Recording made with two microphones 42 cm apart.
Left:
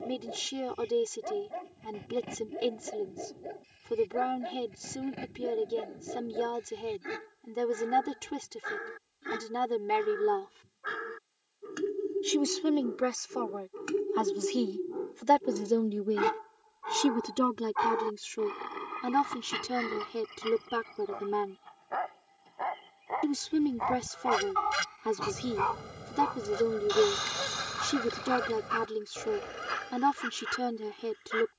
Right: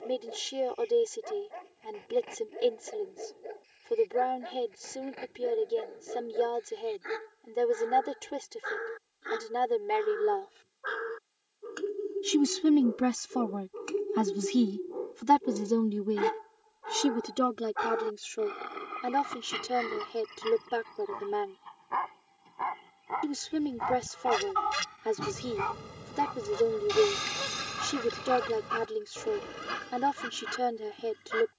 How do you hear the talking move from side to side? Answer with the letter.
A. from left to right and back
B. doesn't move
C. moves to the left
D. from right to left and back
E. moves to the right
A.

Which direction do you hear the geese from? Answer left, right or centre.
centre.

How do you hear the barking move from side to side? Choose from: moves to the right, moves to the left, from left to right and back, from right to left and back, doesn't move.
moves to the right.